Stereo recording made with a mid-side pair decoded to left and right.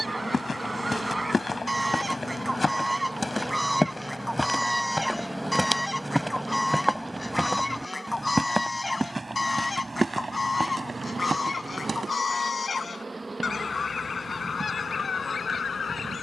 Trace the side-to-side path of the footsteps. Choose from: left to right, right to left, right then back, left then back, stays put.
left to right.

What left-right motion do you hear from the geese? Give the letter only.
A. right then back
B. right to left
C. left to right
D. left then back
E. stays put
B.